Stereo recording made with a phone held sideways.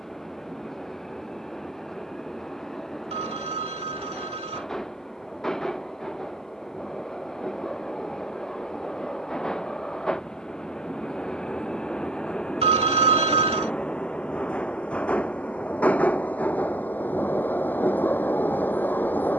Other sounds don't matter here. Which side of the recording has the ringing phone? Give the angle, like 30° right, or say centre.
50° right.